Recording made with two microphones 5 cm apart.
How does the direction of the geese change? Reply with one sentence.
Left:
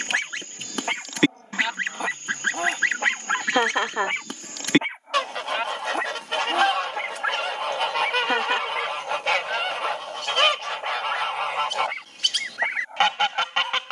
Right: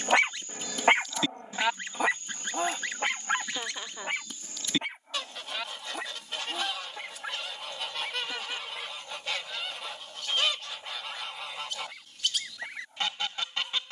In this clip you hear the geese stay put.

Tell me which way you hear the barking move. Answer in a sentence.
In this clip you hear the barking move from right to left.